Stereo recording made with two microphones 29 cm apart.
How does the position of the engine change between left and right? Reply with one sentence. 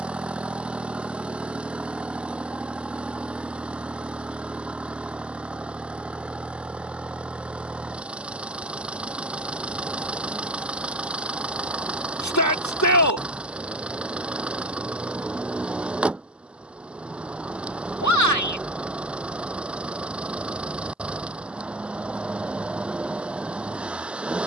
In this clip you hear the engine stay in one place.